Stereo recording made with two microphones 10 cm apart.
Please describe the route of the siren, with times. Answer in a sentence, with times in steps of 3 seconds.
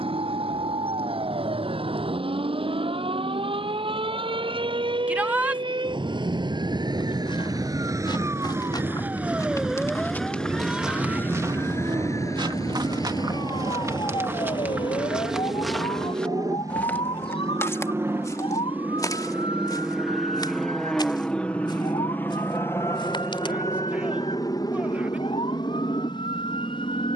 You can hear the siren on the right from 0 s, in the centre from 9 s and on the left from 12 s.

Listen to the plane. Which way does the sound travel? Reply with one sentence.
In this clip you hear the plane go from the right side to the left.